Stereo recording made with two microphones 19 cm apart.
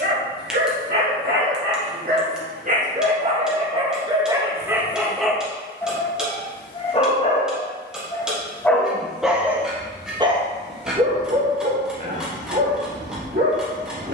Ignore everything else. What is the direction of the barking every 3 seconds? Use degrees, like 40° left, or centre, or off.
50° right, 20° right, 20° left, 30° right, 60° right.